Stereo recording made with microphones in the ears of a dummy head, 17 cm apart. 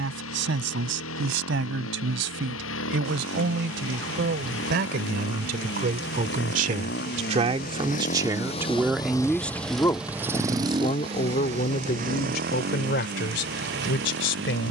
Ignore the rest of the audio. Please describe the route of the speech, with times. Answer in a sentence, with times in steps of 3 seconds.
You can hear the speech on the right from 0 s and on the left from 9 s.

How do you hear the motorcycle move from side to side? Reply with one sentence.
You can hear the motorcycle move from left to right.